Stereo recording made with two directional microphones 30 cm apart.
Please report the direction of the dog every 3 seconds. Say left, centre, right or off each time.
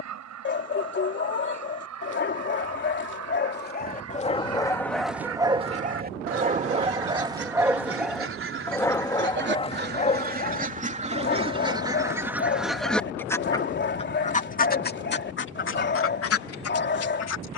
left, centre, centre, left, left, left.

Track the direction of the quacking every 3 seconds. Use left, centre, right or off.
right, right, right, right, centre, left.